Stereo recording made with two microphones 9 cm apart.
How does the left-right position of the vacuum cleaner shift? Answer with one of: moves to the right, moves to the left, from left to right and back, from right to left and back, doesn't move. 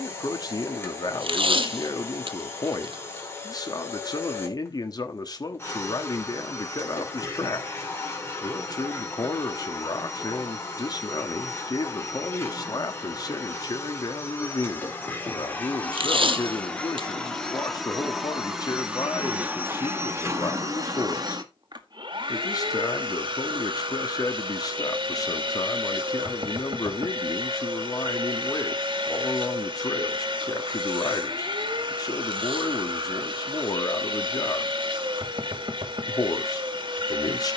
moves to the right.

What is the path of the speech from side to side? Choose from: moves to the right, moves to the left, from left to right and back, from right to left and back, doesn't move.
doesn't move.